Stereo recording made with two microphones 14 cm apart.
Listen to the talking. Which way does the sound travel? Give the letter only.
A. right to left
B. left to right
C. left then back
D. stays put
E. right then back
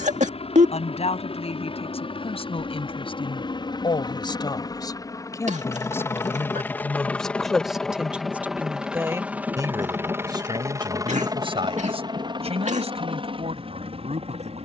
B.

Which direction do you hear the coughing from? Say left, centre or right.
right.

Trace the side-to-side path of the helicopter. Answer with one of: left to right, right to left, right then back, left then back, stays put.
left to right.